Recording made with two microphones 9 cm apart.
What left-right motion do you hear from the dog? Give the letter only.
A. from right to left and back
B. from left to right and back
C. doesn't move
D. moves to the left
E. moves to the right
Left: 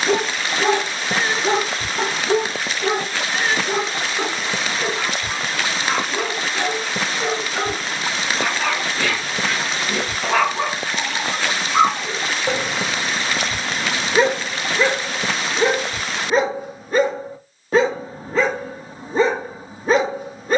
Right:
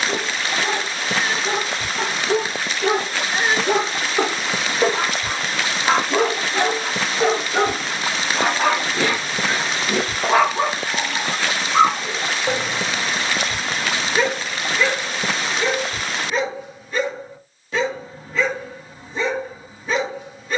B.